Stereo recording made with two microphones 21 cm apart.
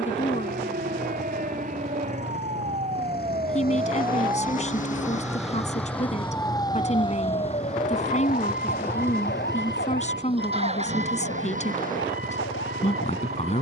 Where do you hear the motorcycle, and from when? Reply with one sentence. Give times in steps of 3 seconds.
In this clip you hear the motorcycle on the left from 0 s, in the centre from 6 s and on the right from 9 s.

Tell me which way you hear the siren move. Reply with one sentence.
You can hear the siren travel towards the left.